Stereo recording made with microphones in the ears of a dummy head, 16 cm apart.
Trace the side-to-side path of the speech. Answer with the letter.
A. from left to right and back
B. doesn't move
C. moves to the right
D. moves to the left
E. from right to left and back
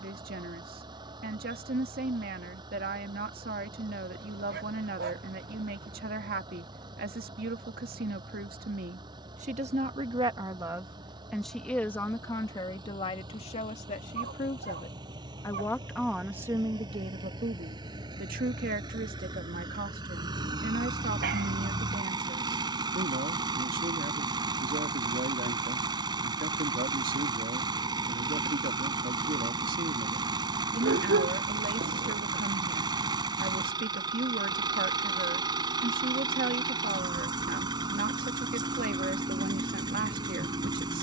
E.